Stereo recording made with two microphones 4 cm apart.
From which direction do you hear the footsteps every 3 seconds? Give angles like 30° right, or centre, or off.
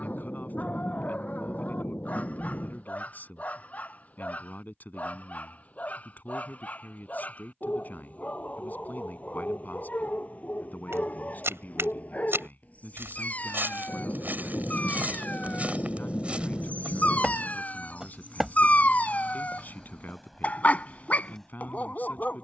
off, off, off, 70° right, 50° right, 30° right, centre, 10° left.